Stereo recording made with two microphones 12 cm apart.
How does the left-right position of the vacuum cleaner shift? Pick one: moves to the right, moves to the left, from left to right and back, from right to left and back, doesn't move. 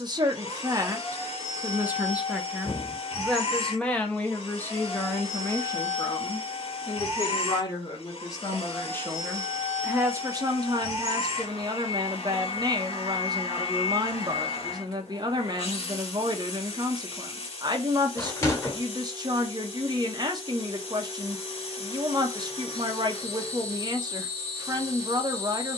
doesn't move.